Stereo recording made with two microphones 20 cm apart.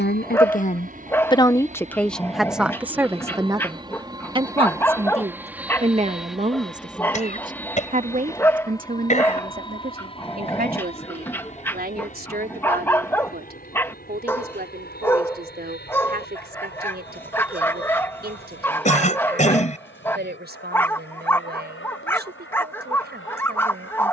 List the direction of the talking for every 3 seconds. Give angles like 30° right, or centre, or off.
20° left, 20° right, 40° right, 40° right, 50° right, 50° right, 50° right, 50° right.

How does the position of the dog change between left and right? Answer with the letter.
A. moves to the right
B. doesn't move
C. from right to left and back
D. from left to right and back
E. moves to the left
B.